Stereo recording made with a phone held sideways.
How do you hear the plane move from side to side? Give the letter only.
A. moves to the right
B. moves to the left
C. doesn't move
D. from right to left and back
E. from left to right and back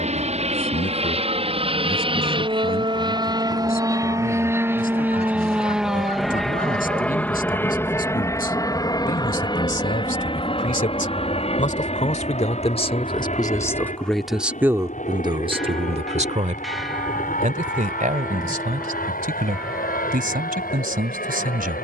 B.